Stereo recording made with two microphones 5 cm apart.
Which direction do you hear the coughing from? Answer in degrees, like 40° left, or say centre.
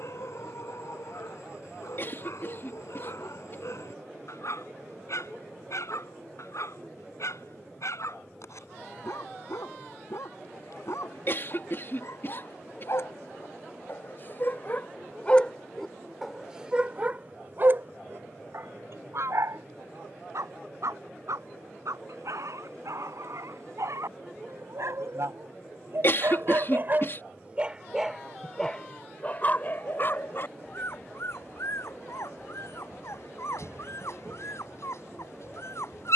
40° left.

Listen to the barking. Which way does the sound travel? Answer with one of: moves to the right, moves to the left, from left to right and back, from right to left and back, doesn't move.
from left to right and back.